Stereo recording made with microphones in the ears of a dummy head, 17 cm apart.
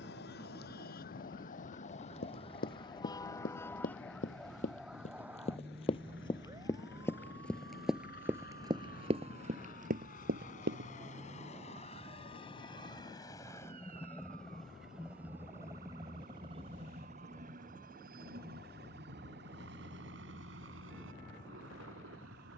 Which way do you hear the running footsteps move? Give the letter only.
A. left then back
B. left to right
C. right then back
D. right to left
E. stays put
B.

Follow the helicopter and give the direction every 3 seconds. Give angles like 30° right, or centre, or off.
60° left, 60° left, 50° left, 40° left, 20° left, 30° right, 60° right, 70° right.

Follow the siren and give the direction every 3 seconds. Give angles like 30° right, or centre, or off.
50° left, centre, 30° right, 40° right, 50° right, 50° right, 50° right, 50° right.